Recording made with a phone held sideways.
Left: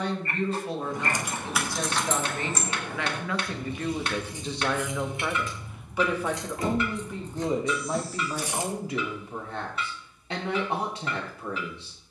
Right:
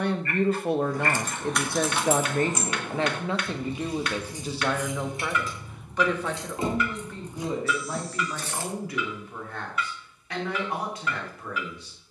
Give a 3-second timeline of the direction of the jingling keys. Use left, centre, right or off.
centre, right, centre, off.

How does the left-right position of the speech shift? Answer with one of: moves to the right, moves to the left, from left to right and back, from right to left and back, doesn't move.
moves to the left.